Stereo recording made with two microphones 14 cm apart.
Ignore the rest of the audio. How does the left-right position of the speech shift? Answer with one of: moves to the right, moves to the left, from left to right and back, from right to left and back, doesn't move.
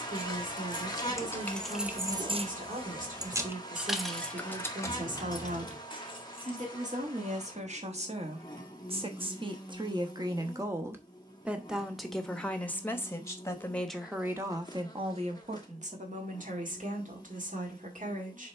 from right to left and back.